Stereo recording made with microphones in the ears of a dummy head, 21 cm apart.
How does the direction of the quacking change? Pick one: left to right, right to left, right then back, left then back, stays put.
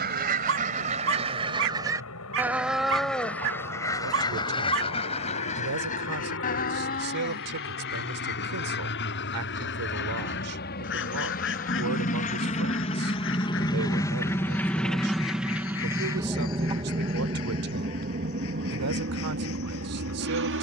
right to left.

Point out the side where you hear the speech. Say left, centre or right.
right.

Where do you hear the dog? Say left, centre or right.
right.